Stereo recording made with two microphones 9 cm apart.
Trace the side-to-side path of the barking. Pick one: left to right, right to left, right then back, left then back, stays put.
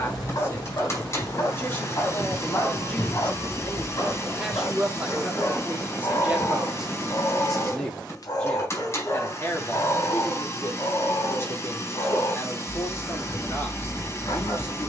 stays put.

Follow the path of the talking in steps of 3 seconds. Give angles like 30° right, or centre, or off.
20° left, 10° right, centre, 30° left, 30° left.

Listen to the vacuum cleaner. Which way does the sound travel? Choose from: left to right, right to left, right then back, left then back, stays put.
stays put.